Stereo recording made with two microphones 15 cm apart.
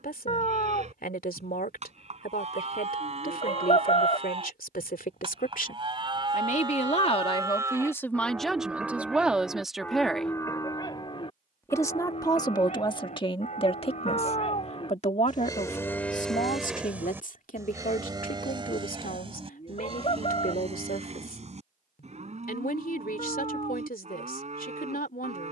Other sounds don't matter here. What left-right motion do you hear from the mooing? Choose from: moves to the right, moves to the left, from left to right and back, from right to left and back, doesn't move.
from right to left and back.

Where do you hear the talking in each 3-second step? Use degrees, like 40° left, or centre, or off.
70° left, 70° left, 20° left, centre, 40° left, 60° left, 70° left, 70° left, 70° left.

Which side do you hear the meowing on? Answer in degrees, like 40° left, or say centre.
50° left.